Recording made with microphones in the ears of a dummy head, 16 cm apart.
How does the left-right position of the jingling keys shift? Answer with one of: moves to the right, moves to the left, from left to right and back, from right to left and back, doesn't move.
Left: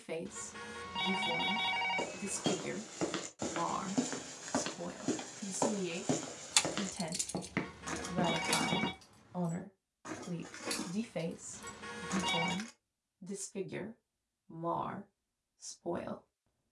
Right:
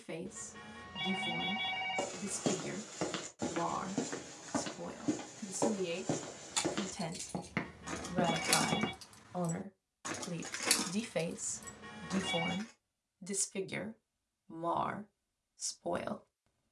from left to right and back.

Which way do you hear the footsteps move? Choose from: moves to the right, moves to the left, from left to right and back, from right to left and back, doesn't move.
from right to left and back.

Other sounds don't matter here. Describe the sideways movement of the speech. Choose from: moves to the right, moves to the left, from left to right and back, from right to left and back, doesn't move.
moves to the right.